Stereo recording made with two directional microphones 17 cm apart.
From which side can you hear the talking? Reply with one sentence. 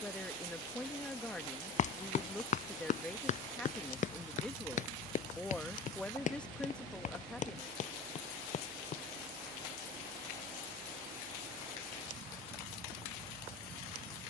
In this clip you hear the talking in the centre.